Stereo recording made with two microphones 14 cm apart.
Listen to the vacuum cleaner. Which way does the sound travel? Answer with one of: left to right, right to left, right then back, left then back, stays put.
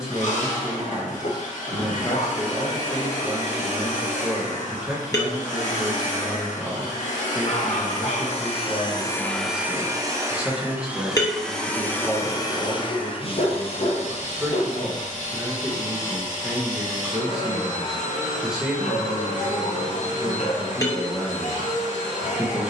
right then back.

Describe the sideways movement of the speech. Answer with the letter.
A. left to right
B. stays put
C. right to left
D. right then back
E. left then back
B.